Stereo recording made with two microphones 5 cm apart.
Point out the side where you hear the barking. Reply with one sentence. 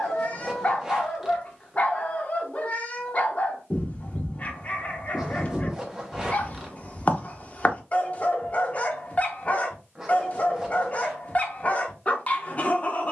In this clip you hear the barking on the left.